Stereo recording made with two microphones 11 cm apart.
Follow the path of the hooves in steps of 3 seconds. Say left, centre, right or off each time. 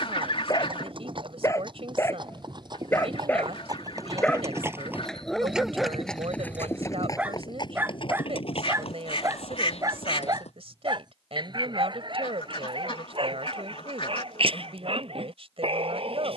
right, right, left, left, off, off.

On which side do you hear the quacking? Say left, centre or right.
left.